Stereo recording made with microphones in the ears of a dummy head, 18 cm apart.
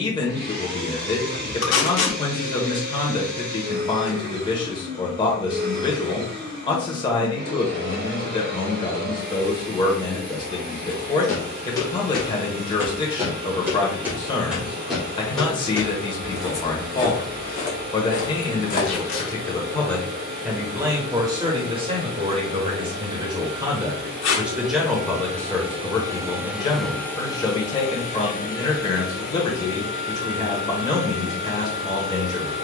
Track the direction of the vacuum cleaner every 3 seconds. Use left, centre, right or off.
right, right, right, right, right, right, right, right, right, left, left.